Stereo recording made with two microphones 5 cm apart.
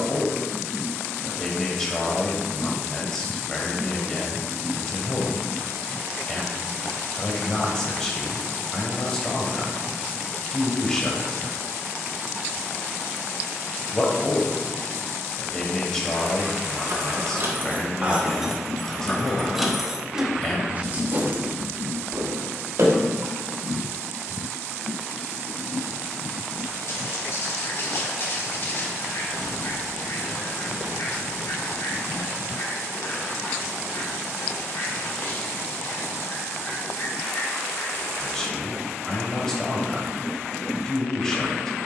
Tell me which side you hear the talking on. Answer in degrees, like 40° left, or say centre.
10° left.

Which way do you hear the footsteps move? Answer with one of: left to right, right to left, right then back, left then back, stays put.
left to right.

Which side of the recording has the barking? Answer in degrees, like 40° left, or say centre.
60° left.